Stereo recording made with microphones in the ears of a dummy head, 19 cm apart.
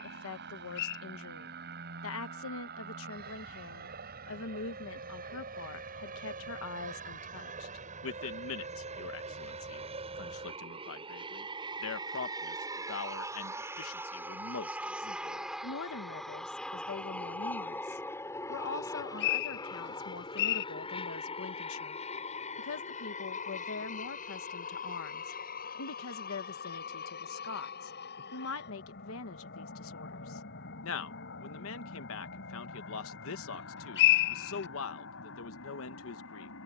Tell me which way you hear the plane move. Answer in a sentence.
In this clip you hear the plane go from the right side to the left.